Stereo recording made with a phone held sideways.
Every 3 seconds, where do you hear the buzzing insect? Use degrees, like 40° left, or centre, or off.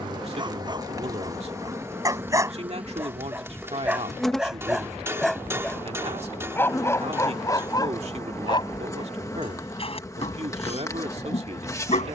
20° right, centre, 20° left, 20° left.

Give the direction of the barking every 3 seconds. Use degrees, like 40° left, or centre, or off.
30° right, 10° right, 20° left, 50° left.